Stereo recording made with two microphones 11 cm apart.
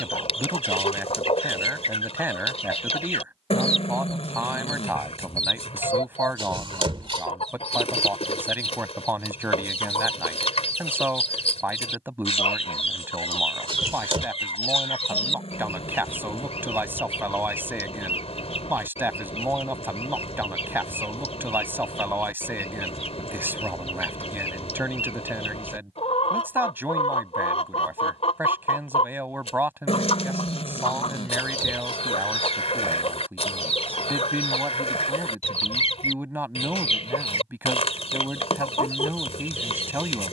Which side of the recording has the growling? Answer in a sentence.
In this clip you hear the growling on the left.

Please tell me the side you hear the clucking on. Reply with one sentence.
You can hear the clucking on the left.